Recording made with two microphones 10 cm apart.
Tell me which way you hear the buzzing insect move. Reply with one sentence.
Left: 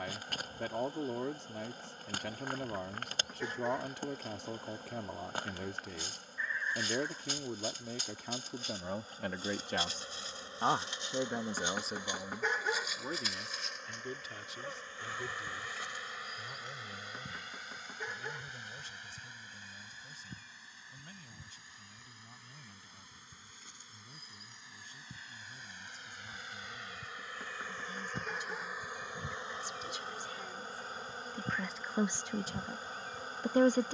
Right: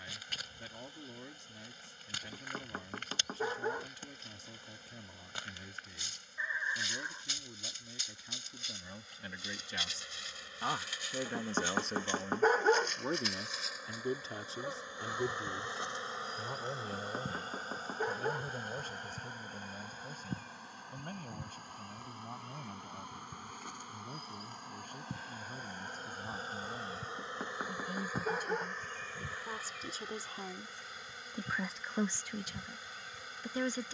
In this clip you hear the buzzing insect go right and come back.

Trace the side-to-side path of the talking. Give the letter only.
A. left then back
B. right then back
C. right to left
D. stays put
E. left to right
B.